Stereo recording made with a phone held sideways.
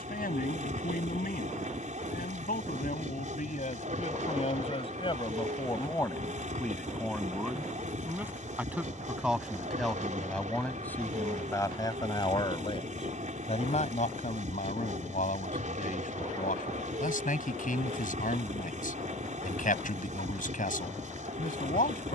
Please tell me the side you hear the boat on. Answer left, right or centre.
right.